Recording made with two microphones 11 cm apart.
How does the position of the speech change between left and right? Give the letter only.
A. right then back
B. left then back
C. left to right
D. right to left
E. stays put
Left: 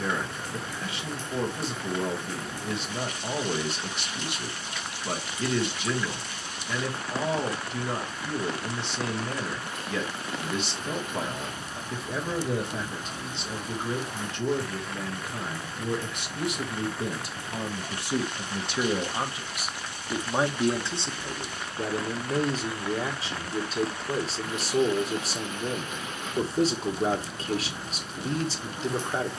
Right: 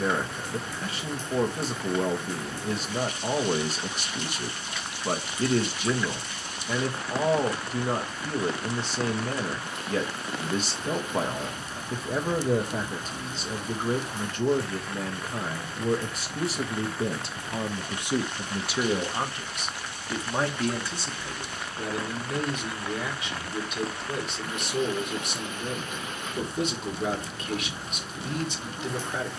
D.